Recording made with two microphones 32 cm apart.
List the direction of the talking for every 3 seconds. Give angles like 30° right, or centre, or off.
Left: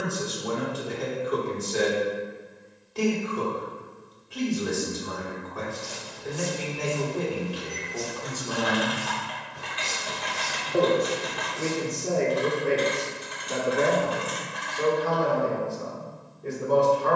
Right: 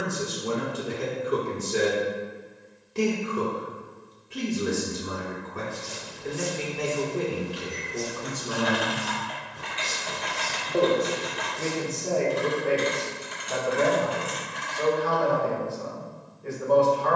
30° right, 30° right, 30° right, 10° left, 30° left, 40° left.